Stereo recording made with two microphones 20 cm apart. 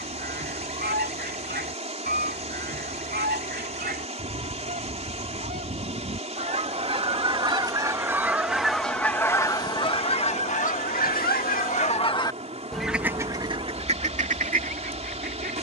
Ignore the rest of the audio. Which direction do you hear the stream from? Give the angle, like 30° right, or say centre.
30° right.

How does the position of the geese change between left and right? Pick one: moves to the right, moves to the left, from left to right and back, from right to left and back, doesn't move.
from right to left and back.